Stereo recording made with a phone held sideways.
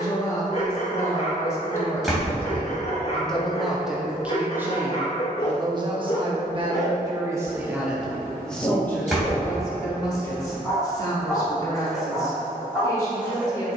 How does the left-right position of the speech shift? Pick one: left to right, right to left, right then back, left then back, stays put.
right then back.